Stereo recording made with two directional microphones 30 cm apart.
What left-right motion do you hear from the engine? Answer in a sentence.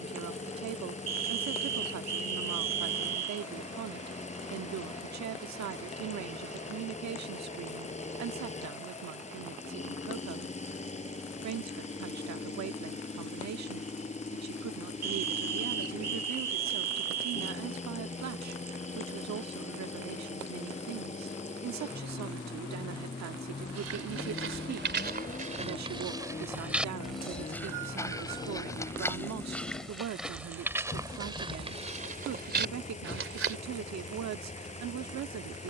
You can hear the engine stay in one place.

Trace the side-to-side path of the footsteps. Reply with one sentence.
In this clip you hear the footsteps go left and come back.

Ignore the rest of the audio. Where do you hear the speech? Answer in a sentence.
You can hear the speech on the right.